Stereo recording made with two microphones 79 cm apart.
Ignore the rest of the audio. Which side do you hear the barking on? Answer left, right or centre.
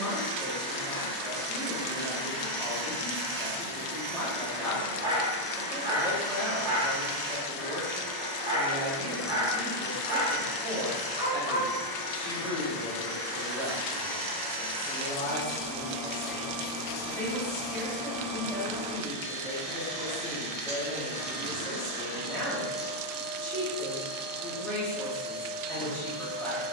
centre.